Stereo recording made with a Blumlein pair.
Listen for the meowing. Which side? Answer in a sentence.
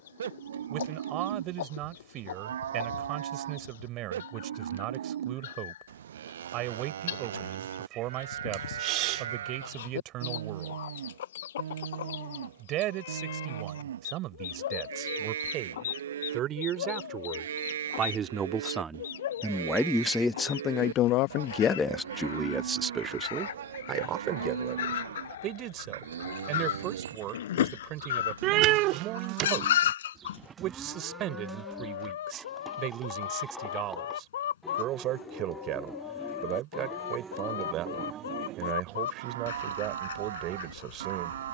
You can hear the meowing on the right.